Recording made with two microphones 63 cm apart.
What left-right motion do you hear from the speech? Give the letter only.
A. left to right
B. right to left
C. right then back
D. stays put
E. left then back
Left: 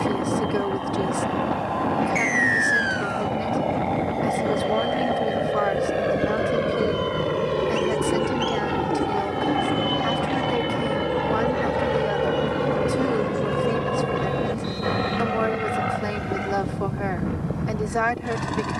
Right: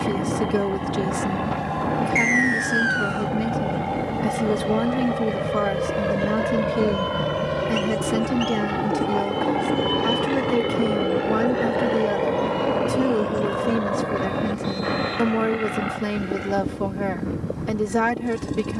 D.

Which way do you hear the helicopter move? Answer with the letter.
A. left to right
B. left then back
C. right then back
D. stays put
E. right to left
E.